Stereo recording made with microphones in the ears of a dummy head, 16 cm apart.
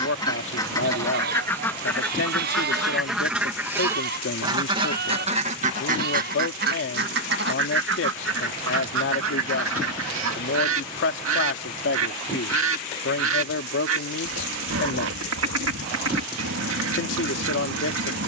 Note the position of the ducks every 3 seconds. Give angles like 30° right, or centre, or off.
10° left, 20° right, 60° right, 80° right, 80° right, 80° right.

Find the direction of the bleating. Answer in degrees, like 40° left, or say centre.
60° right.